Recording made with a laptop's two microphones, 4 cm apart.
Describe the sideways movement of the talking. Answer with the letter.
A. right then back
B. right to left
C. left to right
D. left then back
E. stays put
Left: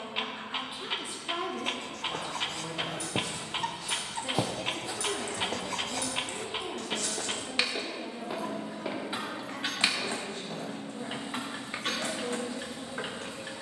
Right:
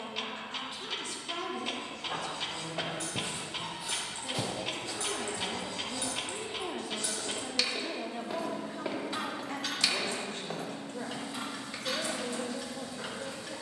C.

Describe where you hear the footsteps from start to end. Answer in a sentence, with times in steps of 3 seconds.
You can hear the footsteps on the right from 0 s, in the centre from 3 s, on the left from 6 s, on the right from 9 s and not at all from 12 s.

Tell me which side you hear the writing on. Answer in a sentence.
In this clip you hear the writing on the left.